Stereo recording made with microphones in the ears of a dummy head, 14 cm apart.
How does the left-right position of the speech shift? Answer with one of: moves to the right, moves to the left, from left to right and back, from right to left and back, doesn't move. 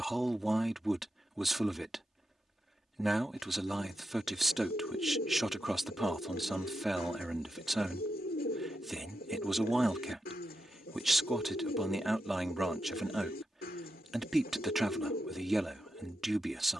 doesn't move.